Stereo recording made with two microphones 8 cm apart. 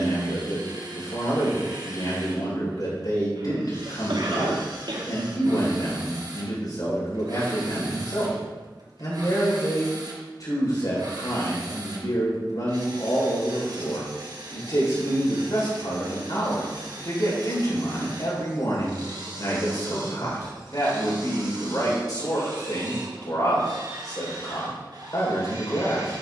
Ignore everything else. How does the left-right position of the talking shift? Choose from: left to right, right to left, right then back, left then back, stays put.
stays put.